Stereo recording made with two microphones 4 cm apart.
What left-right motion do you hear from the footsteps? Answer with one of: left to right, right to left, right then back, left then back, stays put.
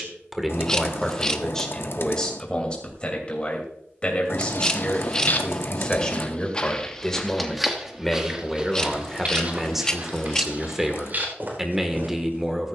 left to right.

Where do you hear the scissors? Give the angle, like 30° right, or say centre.
20° left.